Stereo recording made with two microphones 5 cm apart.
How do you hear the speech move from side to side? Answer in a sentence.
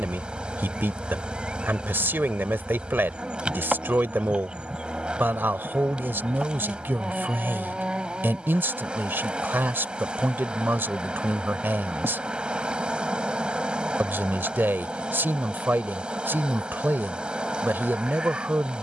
In this clip you hear the speech stay put.